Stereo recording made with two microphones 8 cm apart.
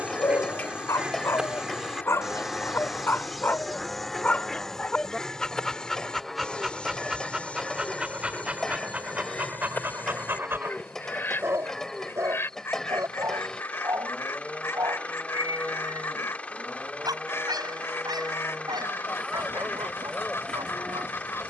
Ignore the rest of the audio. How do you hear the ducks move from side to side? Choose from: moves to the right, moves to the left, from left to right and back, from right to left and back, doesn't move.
moves to the left.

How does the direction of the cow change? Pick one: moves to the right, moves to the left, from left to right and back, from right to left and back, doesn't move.
doesn't move.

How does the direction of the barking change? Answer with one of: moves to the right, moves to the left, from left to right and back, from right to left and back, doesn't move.
moves to the right.